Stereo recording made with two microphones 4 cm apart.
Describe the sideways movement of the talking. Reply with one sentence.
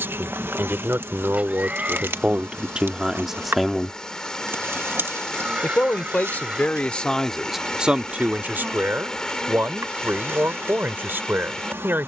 In this clip you hear the talking go left and come back.